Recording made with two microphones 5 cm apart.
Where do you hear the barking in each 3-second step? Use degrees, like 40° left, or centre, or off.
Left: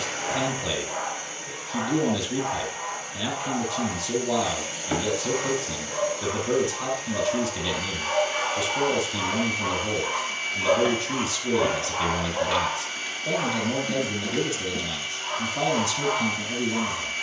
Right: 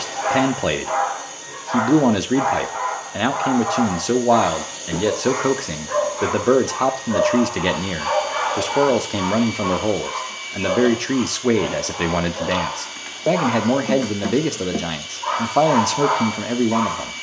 70° right, 70° right, 50° right, centre, 30° right, 60° right.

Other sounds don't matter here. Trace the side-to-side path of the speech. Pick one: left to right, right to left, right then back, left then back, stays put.
stays put.